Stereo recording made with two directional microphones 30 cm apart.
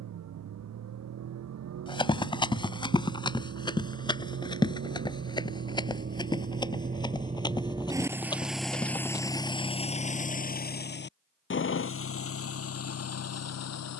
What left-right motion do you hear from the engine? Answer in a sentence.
You can hear the engine move to the left.